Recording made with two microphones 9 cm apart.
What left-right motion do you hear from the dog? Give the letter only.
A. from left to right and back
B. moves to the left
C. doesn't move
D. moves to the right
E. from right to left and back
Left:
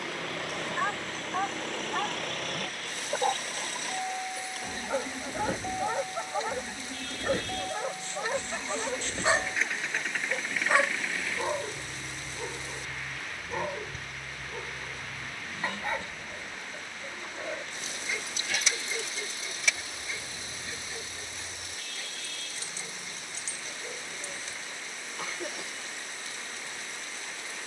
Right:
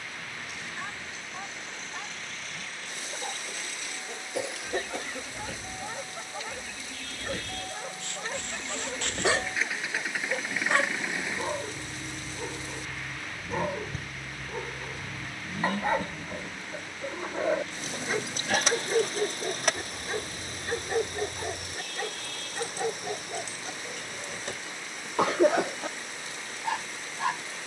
D.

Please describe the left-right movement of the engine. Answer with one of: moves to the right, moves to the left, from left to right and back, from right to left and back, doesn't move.
moves to the right.